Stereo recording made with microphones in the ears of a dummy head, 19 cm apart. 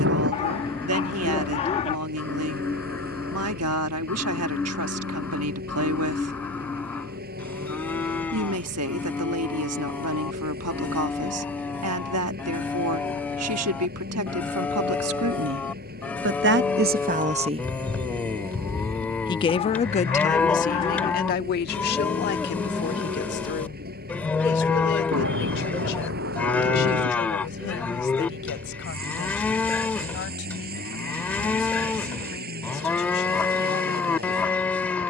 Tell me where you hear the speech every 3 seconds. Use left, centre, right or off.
right, right, right, right, right, right, left, left, left, left, left, left.